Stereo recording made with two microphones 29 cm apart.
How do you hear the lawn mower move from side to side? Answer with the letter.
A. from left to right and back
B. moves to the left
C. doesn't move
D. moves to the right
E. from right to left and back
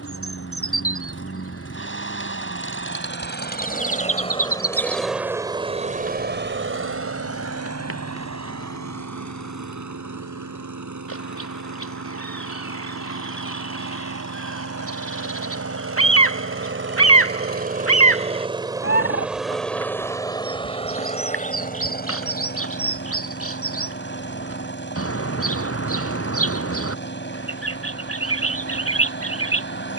A.